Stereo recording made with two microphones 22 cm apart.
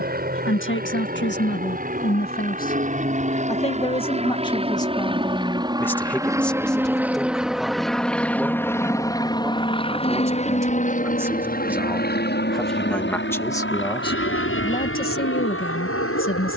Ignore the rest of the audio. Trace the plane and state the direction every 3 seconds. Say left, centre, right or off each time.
right, right, centre, left, left, left.